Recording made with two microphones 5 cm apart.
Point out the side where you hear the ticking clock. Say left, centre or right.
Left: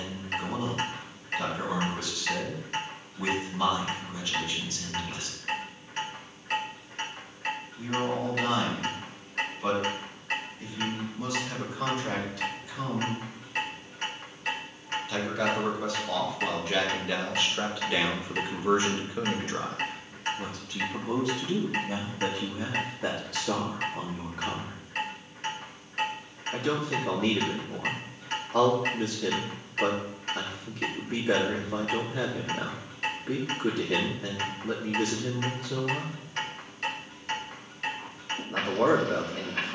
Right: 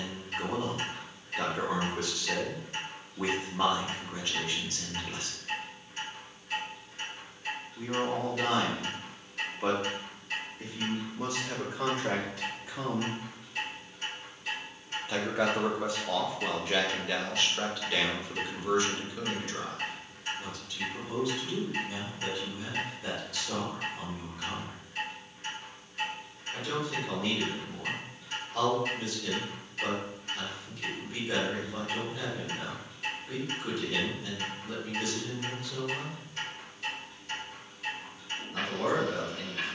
left.